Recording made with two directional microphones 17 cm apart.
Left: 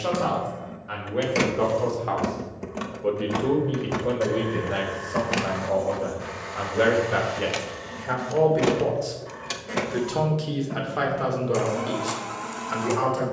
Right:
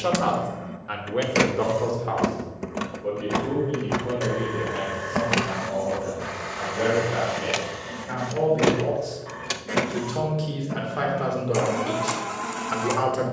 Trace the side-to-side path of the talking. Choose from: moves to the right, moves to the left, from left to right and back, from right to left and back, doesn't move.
from right to left and back.